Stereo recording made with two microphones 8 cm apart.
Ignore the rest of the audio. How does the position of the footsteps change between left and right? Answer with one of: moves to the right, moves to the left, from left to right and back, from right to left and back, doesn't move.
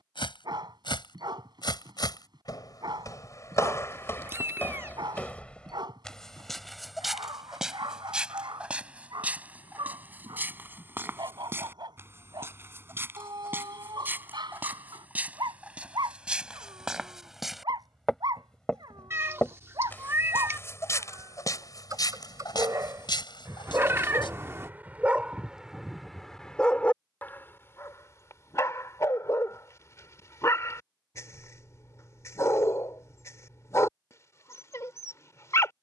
from left to right and back.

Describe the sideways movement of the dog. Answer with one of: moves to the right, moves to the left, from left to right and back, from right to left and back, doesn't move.
moves to the left.